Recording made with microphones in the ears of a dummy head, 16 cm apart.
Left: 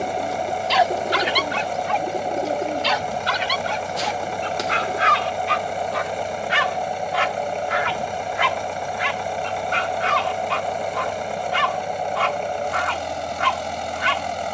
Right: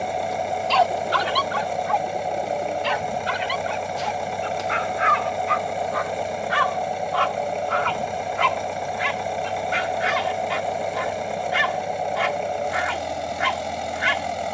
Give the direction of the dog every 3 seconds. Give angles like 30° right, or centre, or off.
30° left, 50° left, 20° left, 10° right, 10° right.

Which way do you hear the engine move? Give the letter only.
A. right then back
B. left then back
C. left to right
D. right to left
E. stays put
E.